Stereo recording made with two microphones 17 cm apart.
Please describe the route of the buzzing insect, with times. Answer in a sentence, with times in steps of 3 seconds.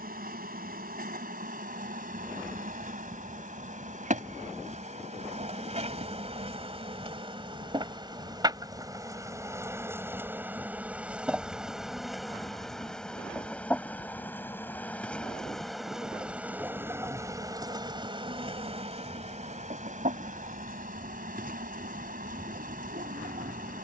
You can hear the buzzing insect on the right from 0 s, in the centre from 9 s and on the right from 18 s.